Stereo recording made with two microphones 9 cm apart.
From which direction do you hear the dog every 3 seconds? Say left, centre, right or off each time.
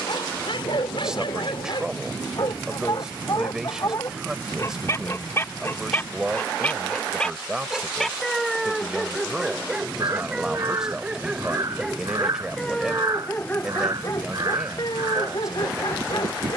left, left, centre, centre, left, left.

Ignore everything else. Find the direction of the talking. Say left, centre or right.
centre.